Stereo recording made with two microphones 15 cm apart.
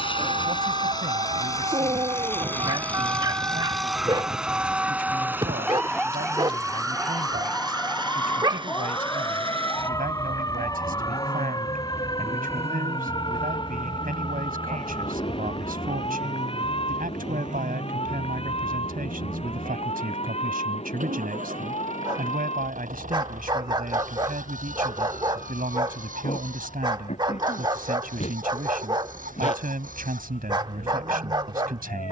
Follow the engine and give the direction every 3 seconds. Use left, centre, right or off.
left, centre, right, right, right, right, right, right, right, right, right.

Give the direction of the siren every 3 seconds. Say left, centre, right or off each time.
right, centre, centre, left, left, left, left, left, left, left, left.